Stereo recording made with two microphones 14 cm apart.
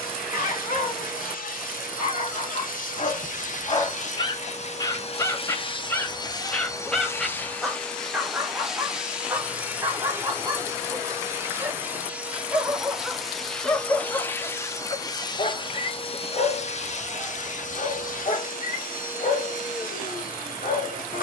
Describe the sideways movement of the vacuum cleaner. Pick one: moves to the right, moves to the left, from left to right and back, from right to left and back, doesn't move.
from left to right and back.